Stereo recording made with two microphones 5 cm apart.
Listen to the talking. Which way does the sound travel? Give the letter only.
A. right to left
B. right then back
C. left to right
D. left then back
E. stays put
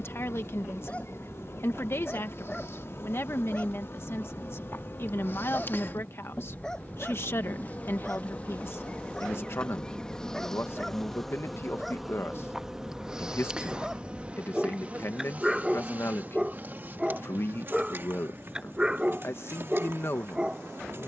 E.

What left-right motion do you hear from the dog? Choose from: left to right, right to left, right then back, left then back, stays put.
left to right.